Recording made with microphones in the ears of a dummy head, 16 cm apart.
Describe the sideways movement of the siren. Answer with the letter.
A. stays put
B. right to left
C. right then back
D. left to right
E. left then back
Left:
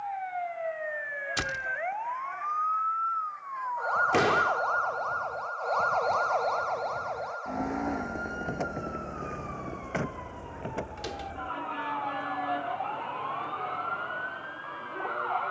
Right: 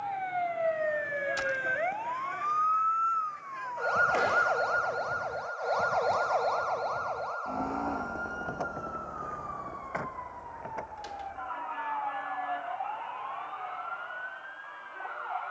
B.